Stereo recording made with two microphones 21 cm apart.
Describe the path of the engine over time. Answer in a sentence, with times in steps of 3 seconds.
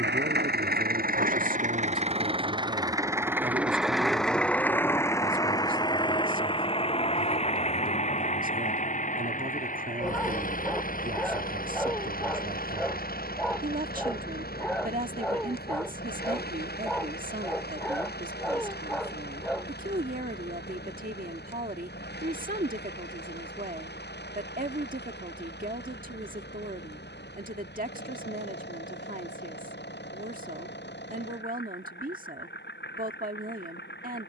You can hear the engine on the right from 0 s, in the centre from 3 s and on the left from 6 s.